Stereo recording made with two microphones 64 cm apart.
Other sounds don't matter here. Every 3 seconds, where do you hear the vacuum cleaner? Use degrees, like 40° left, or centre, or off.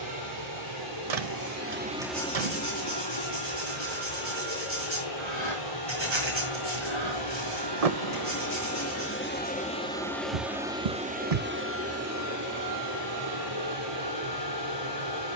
20° right, 60° left, 40° left, centre, 30° right.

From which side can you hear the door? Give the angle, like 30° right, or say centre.
60° right.